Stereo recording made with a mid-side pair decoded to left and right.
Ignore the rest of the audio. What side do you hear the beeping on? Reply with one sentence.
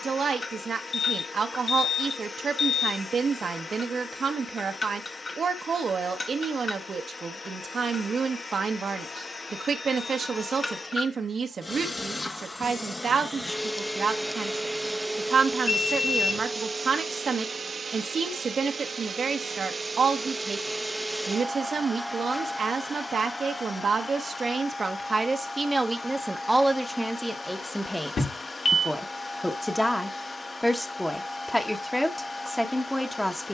In this clip you hear the beeping on the left.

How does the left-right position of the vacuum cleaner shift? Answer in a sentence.
You can hear the vacuum cleaner move from left to right and back again.